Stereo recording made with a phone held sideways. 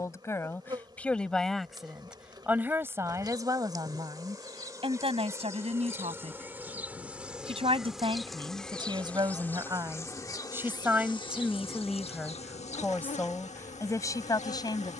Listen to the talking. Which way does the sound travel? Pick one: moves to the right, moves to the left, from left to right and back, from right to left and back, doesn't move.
from left to right and back.